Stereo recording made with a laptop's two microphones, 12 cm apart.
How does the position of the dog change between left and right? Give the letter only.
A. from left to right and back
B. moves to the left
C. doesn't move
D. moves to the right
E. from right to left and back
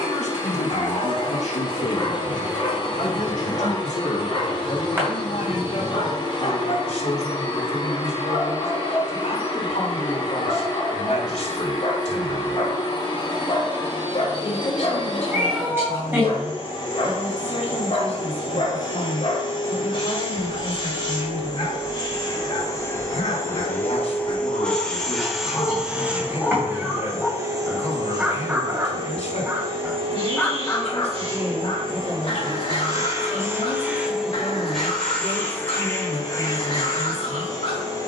A.